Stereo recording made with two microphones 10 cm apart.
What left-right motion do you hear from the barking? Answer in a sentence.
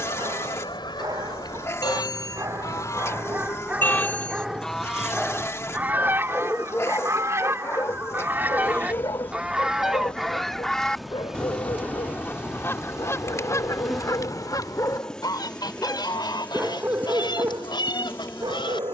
In this clip you hear the barking go left and come back.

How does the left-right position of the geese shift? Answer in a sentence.
In this clip you hear the geese go right and come back.